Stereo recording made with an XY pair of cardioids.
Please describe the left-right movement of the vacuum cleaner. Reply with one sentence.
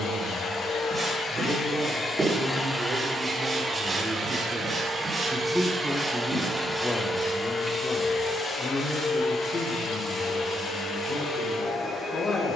You can hear the vacuum cleaner go right and come back.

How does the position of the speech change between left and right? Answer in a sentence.
In this clip you hear the speech go from the right side to the left.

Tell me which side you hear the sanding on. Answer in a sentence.
In this clip you hear the sanding on the right.